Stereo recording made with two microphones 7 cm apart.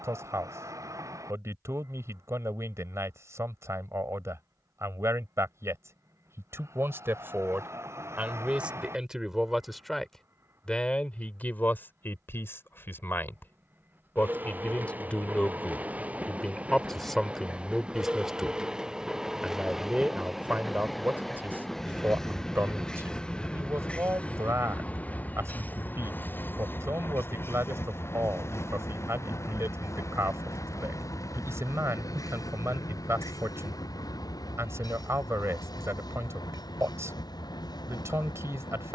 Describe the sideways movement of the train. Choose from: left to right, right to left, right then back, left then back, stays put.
right to left.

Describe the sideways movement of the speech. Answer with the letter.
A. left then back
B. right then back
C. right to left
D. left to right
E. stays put
A.